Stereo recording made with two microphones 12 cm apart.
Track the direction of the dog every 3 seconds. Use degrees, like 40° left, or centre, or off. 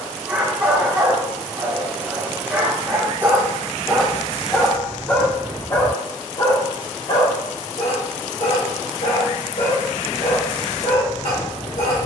10° right, 10° left, 50° left, 70° left.